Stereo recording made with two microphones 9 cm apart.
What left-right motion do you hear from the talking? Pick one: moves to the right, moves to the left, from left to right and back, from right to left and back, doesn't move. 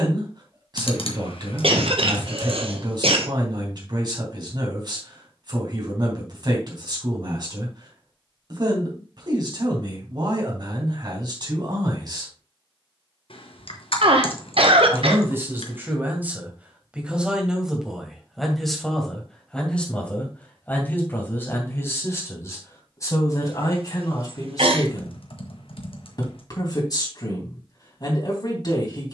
moves to the left.